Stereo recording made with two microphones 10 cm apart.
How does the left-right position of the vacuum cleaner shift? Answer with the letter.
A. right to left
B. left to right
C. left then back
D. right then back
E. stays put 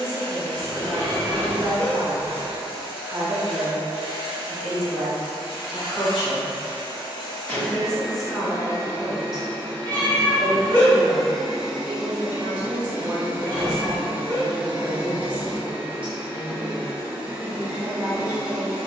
B.